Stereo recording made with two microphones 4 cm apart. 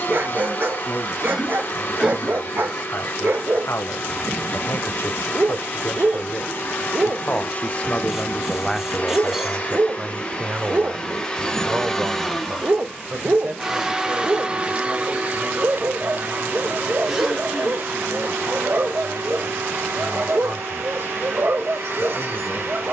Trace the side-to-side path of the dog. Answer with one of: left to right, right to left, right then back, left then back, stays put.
stays put.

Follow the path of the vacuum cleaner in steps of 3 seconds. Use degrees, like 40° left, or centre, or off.
50° left, 50° left, 50° left, 30° left, 10° right, 50° right, 70° right, 70° right.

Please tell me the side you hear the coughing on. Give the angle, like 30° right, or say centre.
10° right.